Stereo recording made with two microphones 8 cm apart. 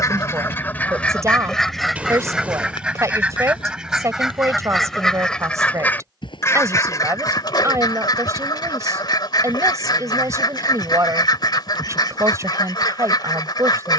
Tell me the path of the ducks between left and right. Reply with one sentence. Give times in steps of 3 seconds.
You can hear the ducks in the centre from 0 s and on the left from 6 s.